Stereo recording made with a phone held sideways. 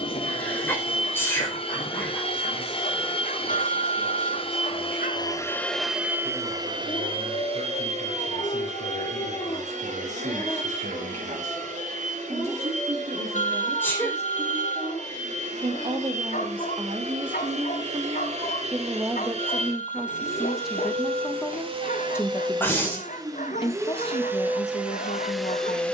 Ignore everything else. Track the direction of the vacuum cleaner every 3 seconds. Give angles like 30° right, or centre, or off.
40° left, 30° left, 40° right, 60° right, 60° right, 60° right, 50° right, 30° right, 10° right.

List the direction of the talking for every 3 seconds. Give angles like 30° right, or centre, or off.
70° right, 60° right, 60° right, 60° right, 50° right, 40° right, 10° right, 20° left, 50° left.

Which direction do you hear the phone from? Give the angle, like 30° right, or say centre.
60° left.